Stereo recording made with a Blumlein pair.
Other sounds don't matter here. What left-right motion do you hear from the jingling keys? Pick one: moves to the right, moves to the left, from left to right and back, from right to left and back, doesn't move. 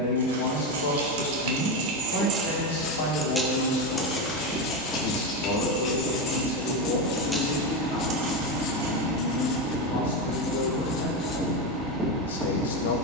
from right to left and back.